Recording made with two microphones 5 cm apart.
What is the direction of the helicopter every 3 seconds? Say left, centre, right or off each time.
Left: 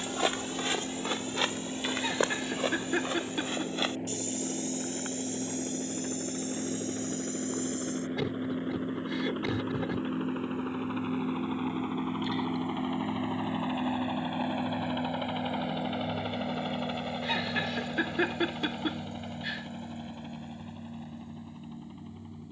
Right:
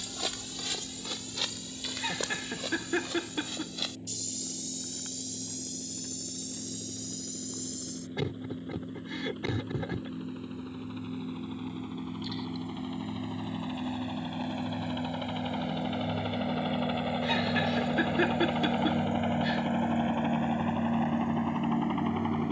left, left, left, left, left, centre, right, right.